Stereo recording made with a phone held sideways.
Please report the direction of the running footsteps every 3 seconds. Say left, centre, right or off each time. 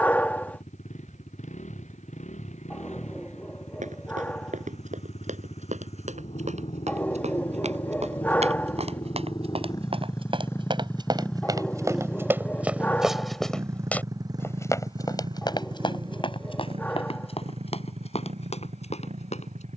off, right, right, right, centre, left, left.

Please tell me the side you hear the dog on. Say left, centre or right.
centre.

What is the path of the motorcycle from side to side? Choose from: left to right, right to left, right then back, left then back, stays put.
left to right.